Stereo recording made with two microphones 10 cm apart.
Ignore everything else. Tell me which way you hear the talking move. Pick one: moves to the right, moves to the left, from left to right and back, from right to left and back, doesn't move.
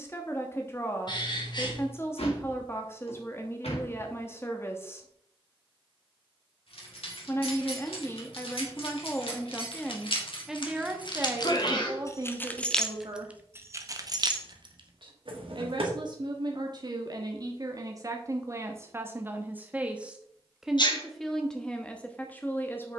from left to right and back.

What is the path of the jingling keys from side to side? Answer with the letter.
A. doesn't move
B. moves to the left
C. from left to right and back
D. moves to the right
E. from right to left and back
D.